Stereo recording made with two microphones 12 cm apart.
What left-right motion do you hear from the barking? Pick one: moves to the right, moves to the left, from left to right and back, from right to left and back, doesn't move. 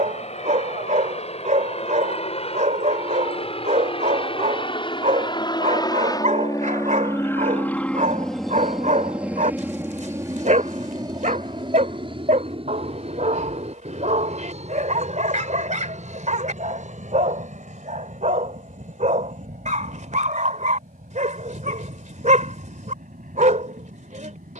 doesn't move.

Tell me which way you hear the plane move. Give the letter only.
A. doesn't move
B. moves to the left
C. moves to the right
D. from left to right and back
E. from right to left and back
C.